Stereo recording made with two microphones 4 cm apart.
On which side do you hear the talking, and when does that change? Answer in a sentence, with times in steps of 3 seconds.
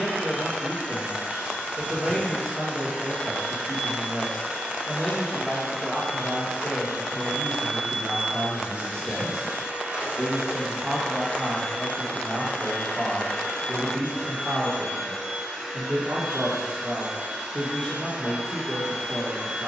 In this clip you hear the talking on the left from 0 s, in the centre from 9 s and on the right from 12 s.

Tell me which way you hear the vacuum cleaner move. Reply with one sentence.
You can hear the vacuum cleaner go left and come back.